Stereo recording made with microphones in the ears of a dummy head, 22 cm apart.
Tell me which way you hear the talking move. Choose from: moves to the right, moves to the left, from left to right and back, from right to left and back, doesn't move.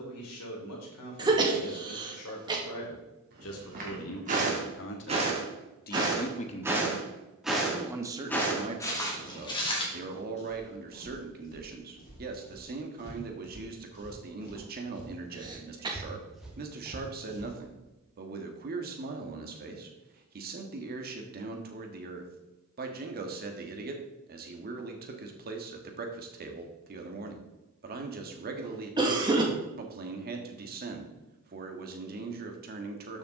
moves to the right.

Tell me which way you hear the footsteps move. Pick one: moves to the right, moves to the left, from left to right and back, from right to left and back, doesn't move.
from right to left and back.